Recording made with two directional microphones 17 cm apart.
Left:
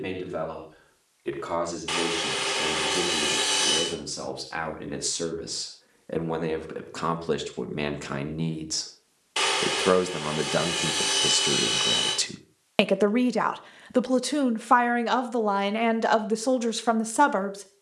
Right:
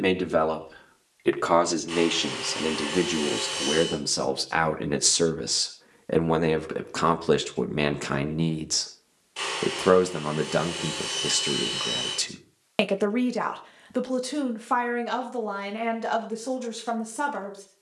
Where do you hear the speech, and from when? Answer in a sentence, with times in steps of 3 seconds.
You can hear the speech on the right from 0 s, in the centre from 9 s and on the left from 12 s.